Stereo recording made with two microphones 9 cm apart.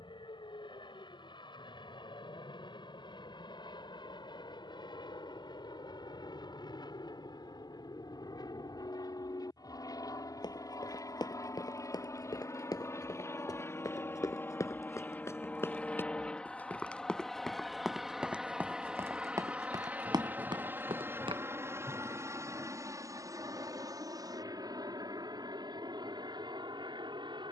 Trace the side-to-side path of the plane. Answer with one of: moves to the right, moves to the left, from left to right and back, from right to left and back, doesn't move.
moves to the right.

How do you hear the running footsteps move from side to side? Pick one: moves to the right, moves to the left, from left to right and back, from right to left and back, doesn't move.
moves to the right.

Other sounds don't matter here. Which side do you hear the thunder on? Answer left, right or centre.
right.